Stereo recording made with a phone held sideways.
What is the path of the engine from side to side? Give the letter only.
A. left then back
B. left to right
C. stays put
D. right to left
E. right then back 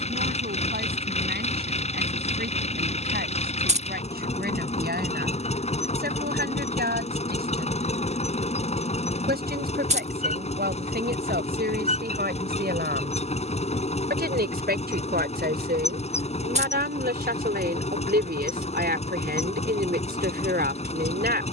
C.